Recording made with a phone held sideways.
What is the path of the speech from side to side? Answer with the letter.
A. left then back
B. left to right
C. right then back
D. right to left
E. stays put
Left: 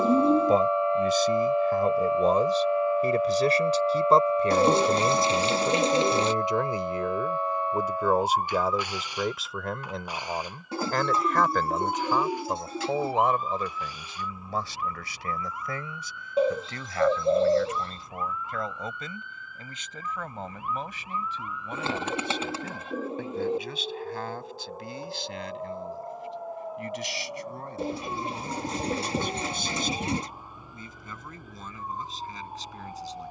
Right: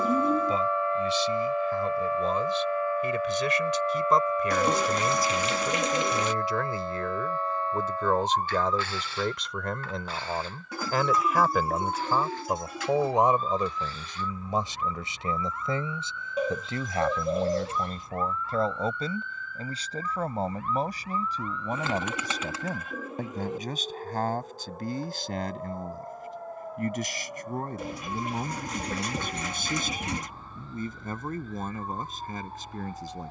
B.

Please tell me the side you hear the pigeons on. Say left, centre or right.
left.